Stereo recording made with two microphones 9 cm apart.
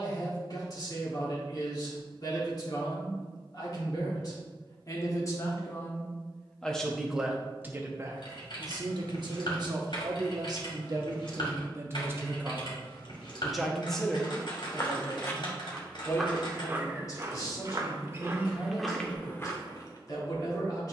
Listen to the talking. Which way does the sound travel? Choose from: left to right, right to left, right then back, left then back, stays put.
right then back.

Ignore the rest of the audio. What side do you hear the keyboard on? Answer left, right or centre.
left.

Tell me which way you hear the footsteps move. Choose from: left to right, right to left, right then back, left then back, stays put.
right then back.